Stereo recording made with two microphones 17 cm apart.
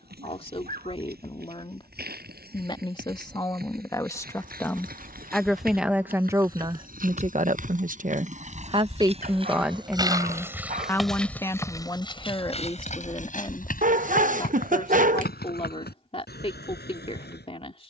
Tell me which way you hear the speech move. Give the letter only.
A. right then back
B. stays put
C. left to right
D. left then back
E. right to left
A.